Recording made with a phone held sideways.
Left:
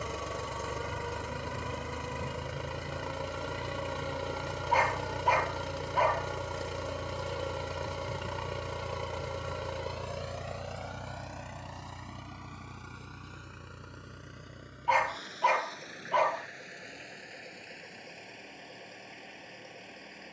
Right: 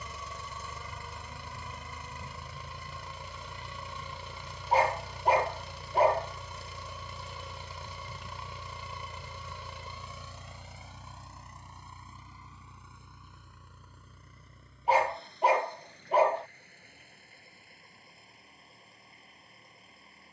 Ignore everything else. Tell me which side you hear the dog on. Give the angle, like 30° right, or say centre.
30° right.